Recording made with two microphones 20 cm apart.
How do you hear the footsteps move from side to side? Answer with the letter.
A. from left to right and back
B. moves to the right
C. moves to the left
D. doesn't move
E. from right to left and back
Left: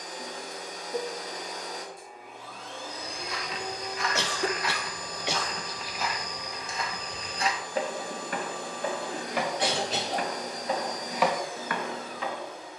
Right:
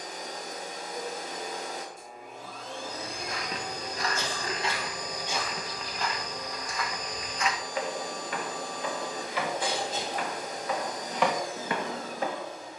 E.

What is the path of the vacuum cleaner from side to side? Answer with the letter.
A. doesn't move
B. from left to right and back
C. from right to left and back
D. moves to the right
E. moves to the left
A.